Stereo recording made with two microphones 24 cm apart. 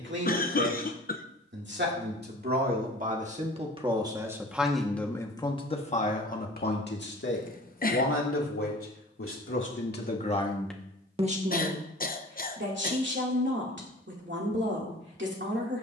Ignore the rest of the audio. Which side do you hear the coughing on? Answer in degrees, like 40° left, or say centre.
40° left.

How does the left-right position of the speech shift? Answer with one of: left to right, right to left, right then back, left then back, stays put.
left then back.